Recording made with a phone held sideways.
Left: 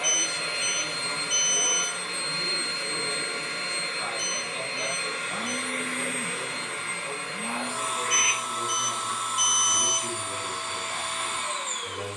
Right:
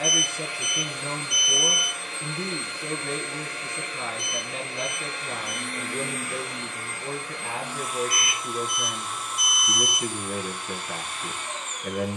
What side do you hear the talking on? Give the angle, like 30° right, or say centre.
80° right.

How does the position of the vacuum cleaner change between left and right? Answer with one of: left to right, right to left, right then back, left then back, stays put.
stays put.